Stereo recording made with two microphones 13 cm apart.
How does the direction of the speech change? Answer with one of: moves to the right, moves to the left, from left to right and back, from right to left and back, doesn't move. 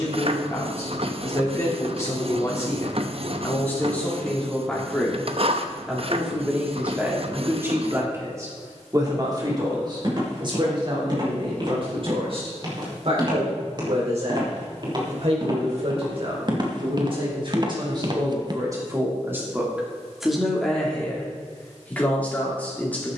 from left to right and back.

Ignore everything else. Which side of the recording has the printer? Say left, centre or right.
right.